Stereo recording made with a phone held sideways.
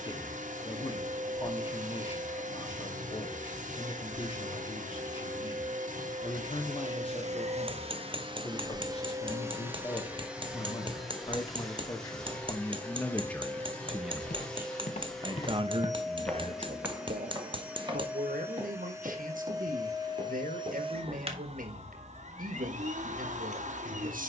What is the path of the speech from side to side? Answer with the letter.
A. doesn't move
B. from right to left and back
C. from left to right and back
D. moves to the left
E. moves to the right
E.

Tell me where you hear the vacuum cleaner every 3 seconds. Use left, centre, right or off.
right, right, right, centre, centre, centre, right, right.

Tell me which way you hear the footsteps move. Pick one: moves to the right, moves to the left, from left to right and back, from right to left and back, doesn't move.
moves to the right.